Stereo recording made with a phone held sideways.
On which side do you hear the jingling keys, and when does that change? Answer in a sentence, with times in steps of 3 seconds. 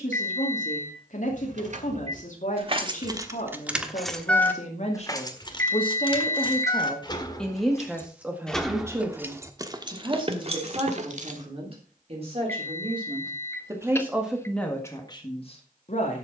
In this clip you hear the jingling keys on the right from 0 s, in the centre from 3 s, on the left from 6 s, on the right from 9 s and not at all from 12 s.